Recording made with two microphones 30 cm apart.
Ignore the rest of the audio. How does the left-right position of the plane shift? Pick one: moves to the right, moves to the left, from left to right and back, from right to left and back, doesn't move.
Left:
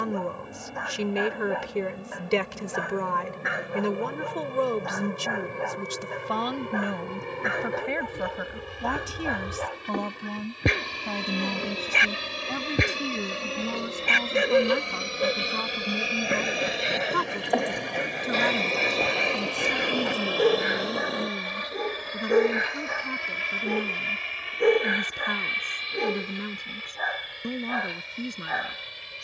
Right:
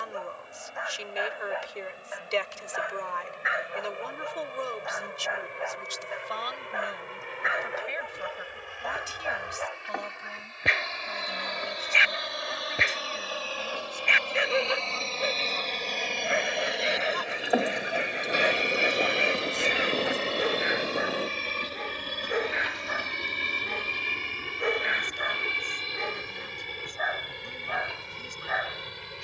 moves to the right.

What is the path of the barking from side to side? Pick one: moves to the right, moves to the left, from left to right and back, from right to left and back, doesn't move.
doesn't move.